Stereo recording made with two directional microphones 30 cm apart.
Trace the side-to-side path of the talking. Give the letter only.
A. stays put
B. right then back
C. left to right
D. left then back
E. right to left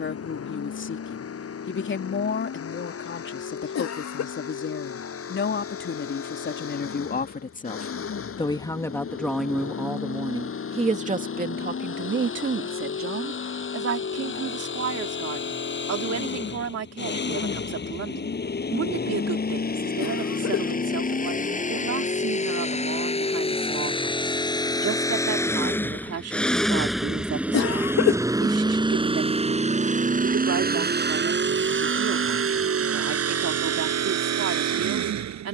C.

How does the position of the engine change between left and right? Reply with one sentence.
In this clip you hear the engine move to the right.